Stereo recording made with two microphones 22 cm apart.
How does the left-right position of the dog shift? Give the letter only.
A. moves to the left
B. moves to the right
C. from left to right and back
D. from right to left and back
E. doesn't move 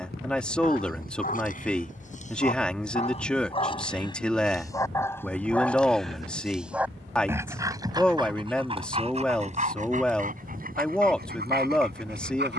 B.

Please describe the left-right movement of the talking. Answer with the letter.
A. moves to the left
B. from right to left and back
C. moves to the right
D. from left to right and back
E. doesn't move
E.